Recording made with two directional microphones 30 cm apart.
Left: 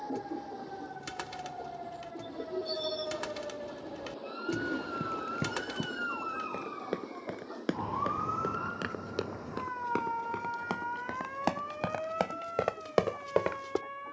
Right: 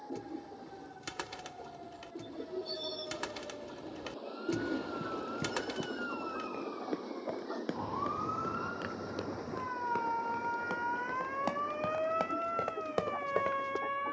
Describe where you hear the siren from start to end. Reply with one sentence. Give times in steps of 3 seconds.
In this clip you hear the siren on the left from 0 s, in the centre from 9 s and on the right from 12 s.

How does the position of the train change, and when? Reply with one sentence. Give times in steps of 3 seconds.
In this clip you hear the train on the left from 0 s, in the centre from 3 s and on the right from 6 s.